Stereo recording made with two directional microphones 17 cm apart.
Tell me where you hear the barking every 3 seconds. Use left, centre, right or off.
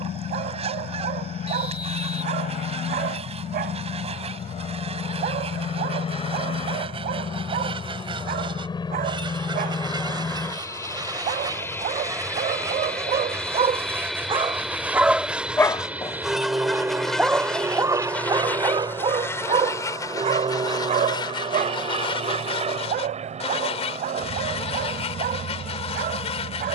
right, right, right, right, right, centre, right, right, right.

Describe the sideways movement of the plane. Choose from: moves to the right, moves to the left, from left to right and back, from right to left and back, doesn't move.
moves to the right.